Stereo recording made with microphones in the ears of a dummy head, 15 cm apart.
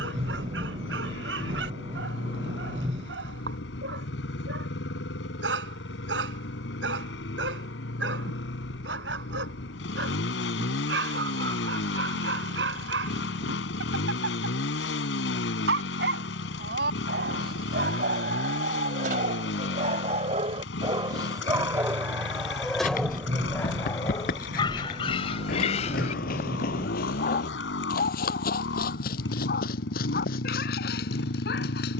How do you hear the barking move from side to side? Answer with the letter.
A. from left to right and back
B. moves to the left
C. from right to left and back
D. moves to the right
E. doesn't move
B.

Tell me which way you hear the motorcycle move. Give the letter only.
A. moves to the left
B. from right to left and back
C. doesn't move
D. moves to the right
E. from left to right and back
C.